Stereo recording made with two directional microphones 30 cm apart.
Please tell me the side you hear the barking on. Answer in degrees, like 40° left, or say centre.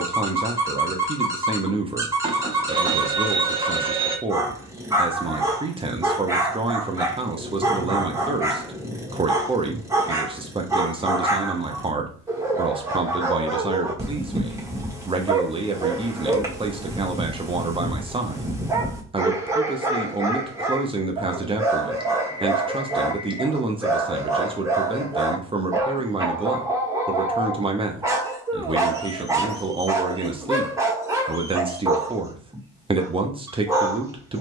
10° right.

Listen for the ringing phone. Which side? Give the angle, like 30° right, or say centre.
20° right.